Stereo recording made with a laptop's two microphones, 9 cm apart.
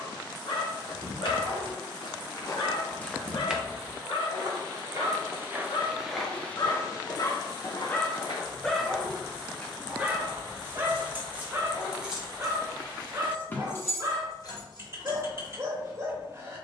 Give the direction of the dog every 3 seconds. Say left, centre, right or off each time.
left, left, left, right, right, right.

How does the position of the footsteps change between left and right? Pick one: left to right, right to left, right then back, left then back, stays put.
right then back.